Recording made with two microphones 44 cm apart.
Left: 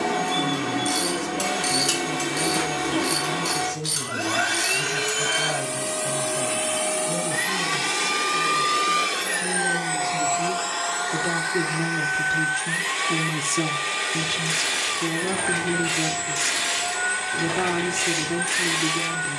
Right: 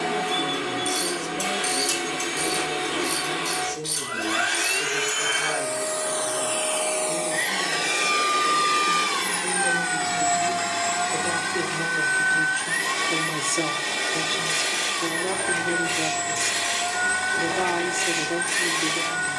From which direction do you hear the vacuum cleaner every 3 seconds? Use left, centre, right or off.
left, left, left, right, right, right, right.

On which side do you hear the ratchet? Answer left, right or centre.
left.